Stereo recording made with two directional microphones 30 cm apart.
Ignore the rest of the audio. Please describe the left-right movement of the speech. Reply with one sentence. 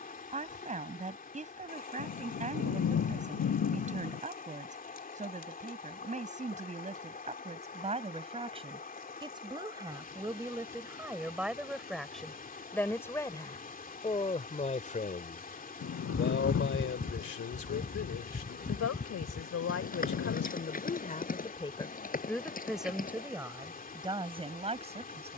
You can hear the speech go left and come back.